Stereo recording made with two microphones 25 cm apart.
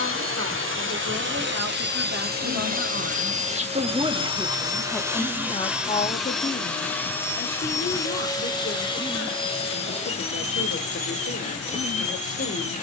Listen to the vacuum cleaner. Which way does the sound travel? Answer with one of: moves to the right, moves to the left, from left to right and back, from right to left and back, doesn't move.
moves to the left.